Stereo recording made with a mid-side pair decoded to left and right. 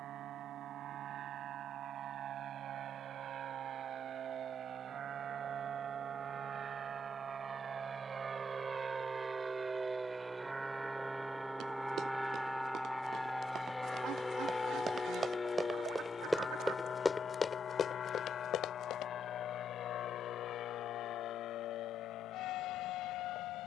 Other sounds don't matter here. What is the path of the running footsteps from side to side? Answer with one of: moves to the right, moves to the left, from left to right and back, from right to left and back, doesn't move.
moves to the left.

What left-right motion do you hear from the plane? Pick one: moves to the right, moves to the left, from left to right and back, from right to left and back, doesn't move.
moves to the left.